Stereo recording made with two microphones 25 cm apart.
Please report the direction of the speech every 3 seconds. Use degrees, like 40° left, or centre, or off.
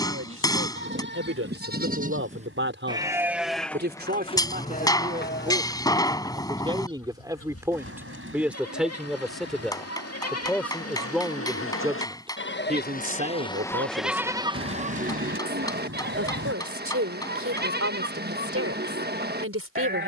60° right, 40° right, 10° right, centre, 40° right, 60° right, 60° right.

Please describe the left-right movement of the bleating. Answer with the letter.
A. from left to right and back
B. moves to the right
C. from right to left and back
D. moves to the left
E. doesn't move
C.